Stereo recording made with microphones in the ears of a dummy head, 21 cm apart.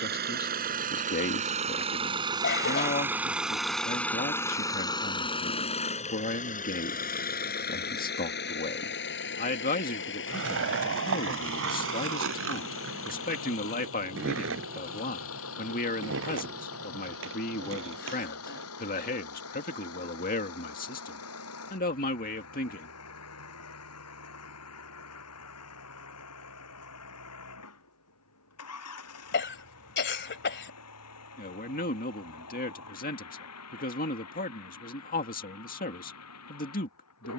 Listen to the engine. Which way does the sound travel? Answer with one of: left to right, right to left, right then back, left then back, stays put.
right to left.